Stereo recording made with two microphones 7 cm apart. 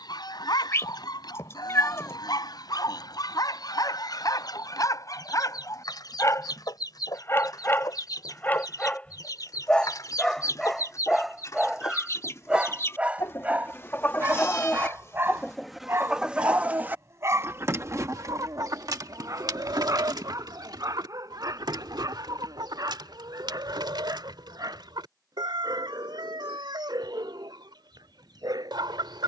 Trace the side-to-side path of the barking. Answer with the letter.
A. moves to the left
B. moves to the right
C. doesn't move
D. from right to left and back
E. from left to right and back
B.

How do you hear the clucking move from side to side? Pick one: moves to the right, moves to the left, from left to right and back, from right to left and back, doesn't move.
moves to the right.